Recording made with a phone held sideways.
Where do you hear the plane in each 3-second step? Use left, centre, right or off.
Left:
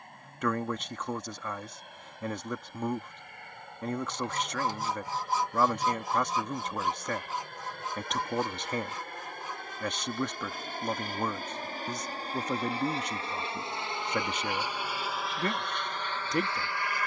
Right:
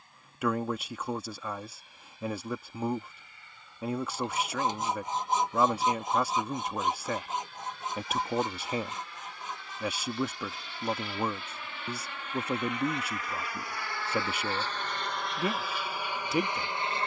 left, left, left, left, left, centre.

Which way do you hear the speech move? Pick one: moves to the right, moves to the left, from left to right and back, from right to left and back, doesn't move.
doesn't move.